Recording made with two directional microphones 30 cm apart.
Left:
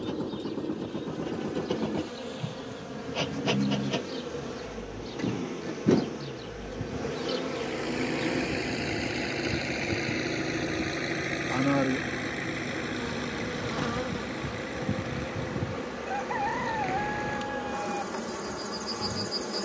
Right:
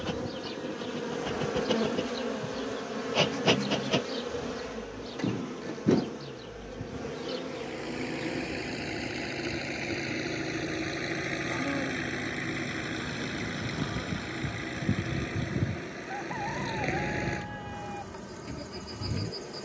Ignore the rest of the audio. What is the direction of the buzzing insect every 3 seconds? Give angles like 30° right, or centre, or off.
40° right, 10° right, 20° left, 40° left, 50° left, 50° left, 50° left.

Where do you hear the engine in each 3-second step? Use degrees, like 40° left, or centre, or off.
50° left, 40° left, 30° left, 10° left, 10° right, 40° right, 50° right.